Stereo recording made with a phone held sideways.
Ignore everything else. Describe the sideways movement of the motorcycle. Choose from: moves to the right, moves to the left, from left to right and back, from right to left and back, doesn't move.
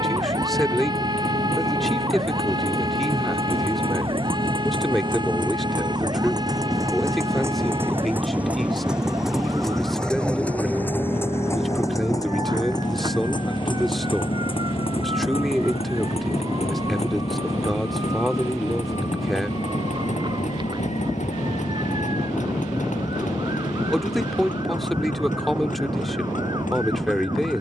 moves to the left.